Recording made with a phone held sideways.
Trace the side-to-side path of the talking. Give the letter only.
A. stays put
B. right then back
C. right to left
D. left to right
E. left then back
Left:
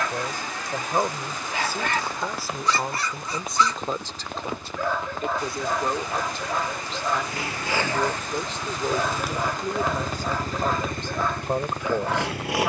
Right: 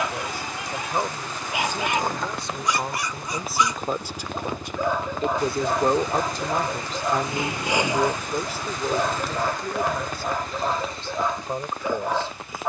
B.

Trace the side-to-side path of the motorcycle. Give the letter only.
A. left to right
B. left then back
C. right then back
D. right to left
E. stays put
D.